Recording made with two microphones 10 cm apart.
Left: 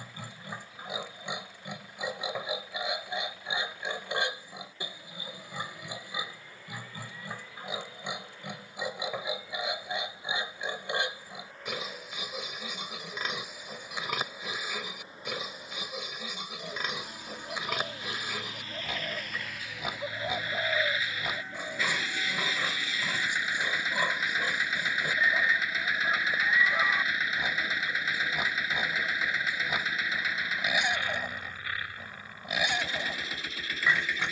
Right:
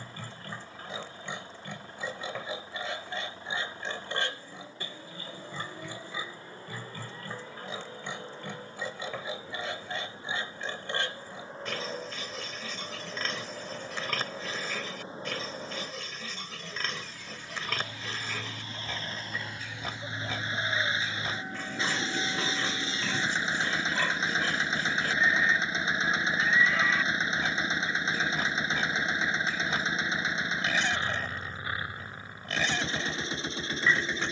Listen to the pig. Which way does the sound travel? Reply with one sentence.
You can hear the pig stay put.